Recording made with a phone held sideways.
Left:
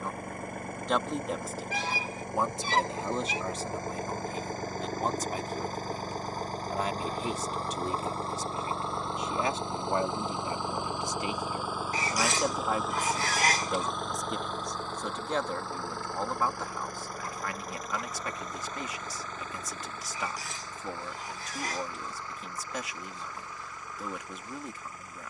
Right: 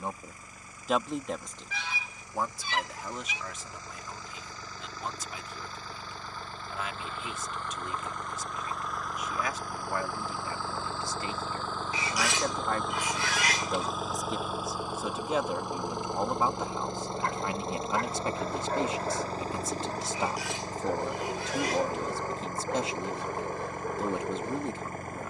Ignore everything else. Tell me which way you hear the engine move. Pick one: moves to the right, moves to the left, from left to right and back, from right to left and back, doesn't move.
moves to the right.